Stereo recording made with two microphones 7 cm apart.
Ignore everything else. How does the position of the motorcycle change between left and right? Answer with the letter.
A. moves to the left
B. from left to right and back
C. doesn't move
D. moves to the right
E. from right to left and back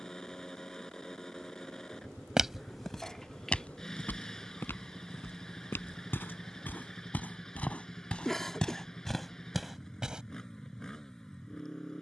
C.